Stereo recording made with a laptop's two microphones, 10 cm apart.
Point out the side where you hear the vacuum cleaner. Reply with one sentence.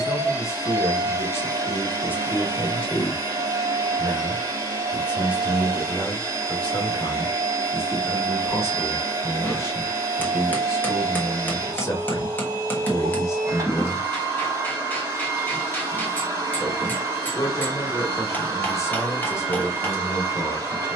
In this clip you hear the vacuum cleaner on the right.